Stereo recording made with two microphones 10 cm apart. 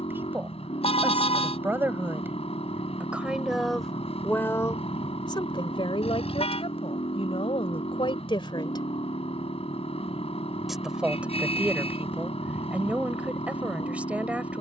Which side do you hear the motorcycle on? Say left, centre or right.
left.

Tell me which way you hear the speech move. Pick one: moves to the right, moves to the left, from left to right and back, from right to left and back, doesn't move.
from right to left and back.